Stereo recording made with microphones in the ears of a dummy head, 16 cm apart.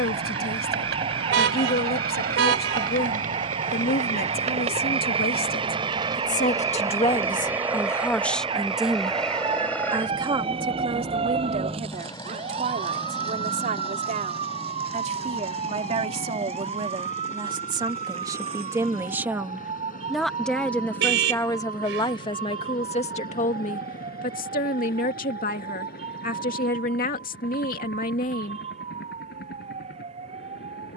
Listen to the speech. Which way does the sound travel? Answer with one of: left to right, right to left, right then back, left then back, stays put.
right then back.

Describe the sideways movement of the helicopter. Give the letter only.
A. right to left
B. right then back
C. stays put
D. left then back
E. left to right
A.